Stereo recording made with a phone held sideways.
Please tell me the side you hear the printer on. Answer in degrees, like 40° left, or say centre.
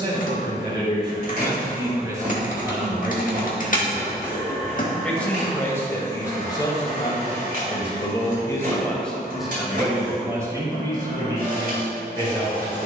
60° right.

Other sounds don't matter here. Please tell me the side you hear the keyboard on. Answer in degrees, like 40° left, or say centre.
50° left.